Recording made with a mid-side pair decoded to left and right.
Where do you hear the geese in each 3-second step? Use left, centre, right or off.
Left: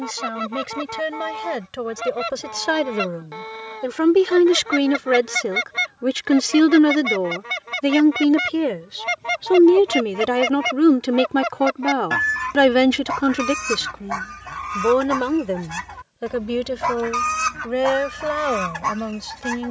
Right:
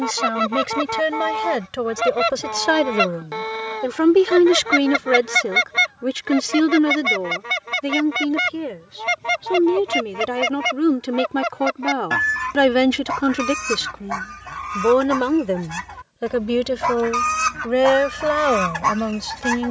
right, right, right, centre, centre, centre, right.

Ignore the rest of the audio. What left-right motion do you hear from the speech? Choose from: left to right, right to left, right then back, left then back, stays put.
left then back.